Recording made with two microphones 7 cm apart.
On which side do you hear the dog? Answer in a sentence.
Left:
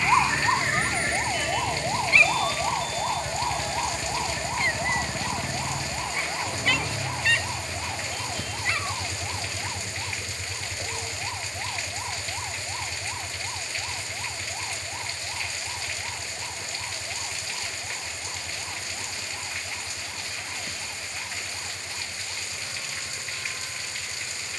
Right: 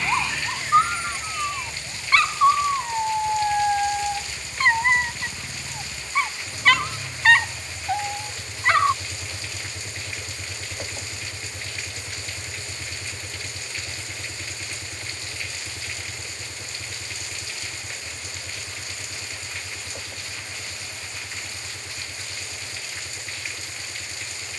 In this clip you hear the dog on the right.